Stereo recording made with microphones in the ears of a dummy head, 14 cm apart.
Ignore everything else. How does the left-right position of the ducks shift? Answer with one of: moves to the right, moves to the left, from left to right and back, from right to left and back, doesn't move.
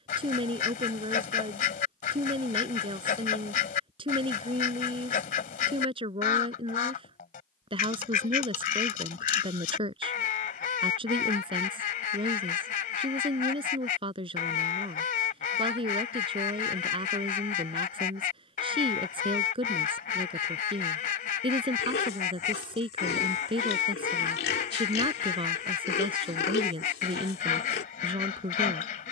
doesn't move.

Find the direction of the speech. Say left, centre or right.
right.